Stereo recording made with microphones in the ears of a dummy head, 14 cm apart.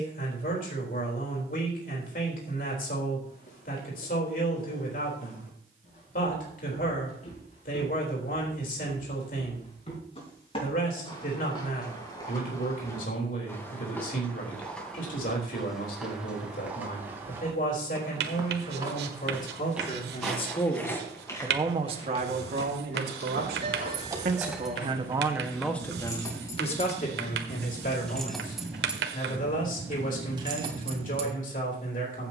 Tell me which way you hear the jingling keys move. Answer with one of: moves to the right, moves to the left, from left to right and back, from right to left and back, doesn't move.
from right to left and back.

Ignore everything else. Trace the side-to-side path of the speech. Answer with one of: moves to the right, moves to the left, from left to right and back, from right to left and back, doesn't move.
from left to right and back.